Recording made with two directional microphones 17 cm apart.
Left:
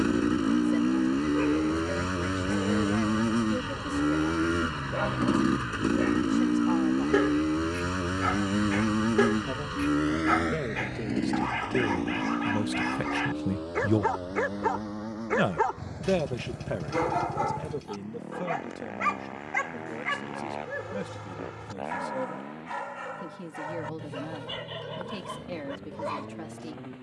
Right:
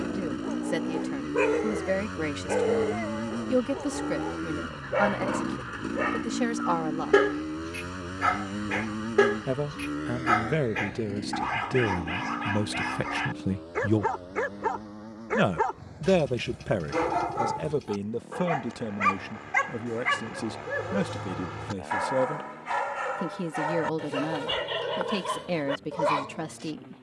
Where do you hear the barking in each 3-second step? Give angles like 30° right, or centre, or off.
50° right, 40° right, 30° right, 10° right, centre, centre, 20° right, 40° right, 50° right.